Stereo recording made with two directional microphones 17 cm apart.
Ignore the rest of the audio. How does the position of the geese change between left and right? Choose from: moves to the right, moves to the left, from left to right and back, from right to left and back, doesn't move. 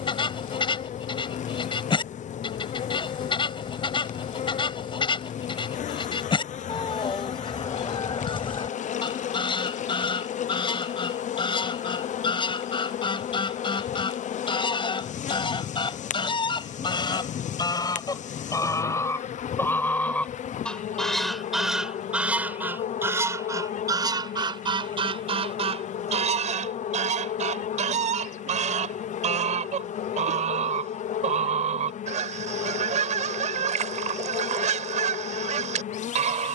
moves to the right.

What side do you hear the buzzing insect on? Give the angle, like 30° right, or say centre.
50° left.